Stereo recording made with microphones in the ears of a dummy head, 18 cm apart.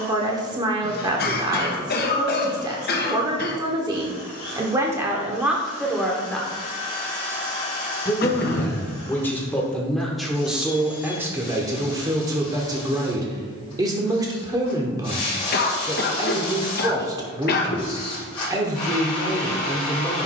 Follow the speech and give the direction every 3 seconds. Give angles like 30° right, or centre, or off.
20° right, 10° right, 10° left, centre, 20° right, 20° right, 20° right.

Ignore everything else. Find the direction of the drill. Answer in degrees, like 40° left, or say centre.
30° left.